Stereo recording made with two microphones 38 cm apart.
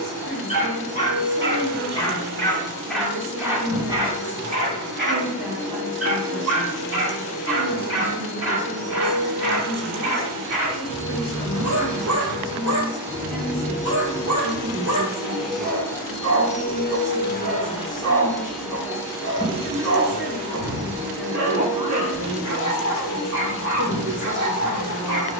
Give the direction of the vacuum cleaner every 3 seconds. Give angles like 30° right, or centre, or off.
40° right, 40° right, 40° right, 40° right, 20° right, 10° left, 10° right, 30° right, 40° right.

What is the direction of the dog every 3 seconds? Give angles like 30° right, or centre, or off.
10° left, 20° right, 40° right, 40° right, 40° right, 40° right, 40° right, 40° right, 40° right.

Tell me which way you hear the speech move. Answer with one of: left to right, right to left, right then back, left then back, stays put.
stays put.